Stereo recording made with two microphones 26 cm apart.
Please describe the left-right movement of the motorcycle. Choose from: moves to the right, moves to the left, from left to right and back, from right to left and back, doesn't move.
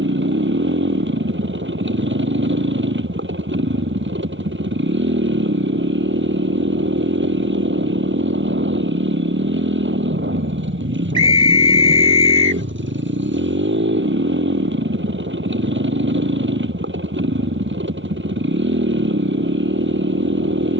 doesn't move.